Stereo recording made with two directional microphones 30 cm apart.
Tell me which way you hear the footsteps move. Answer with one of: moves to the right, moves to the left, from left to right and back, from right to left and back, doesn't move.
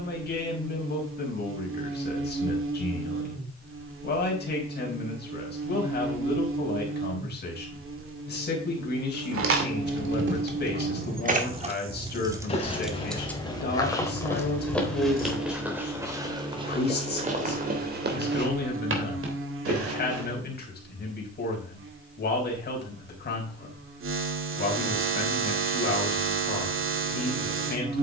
moves to the right.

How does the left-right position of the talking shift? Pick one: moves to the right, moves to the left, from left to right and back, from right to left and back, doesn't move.
doesn't move.